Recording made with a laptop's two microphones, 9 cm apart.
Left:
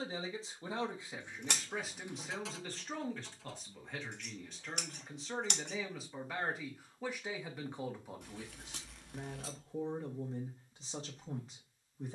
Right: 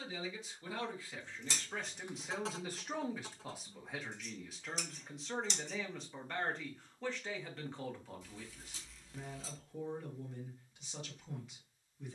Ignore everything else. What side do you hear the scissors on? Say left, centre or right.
left.